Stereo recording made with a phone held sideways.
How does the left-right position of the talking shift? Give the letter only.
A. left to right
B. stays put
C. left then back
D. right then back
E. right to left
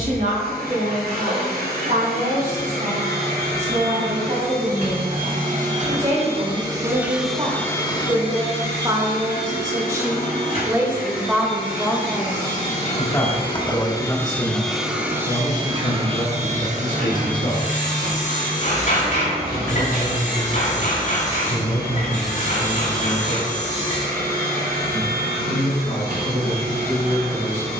E.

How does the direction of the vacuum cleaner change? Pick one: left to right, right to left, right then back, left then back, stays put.
left then back.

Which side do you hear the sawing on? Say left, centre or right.
left.